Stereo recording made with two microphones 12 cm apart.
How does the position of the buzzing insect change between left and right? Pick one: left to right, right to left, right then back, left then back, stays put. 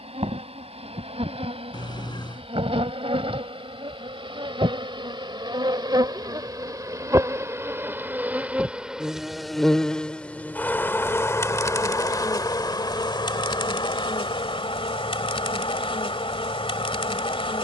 right to left.